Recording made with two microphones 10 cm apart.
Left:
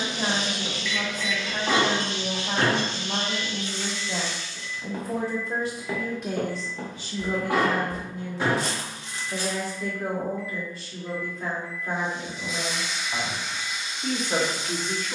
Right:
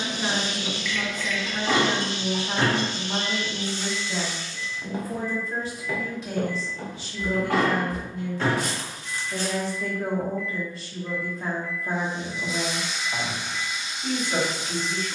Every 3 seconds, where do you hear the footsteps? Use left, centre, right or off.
off, centre, left, centre, off.